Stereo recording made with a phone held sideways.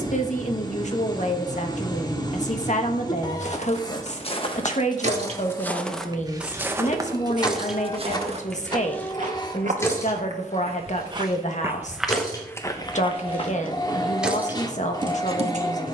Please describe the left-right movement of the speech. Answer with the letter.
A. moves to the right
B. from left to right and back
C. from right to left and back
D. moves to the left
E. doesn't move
E.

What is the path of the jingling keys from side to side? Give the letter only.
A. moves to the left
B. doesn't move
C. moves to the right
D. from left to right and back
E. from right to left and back
E.